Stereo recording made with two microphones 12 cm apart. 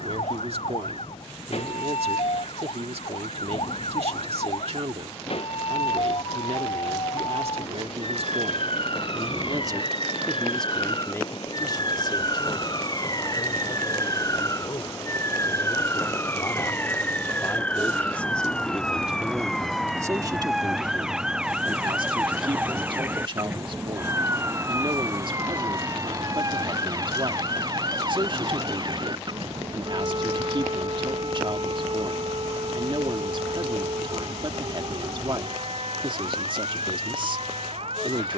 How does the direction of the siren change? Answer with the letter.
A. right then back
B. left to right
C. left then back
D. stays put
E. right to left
B.